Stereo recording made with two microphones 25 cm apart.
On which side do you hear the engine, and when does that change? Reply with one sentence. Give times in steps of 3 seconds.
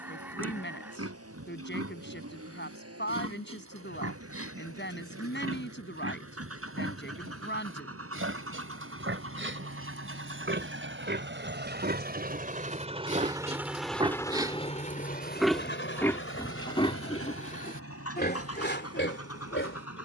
In this clip you hear the engine on the right from 0 s, in the centre from 12 s and on the left from 15 s.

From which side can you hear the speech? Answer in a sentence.
In this clip you hear the speech on the left.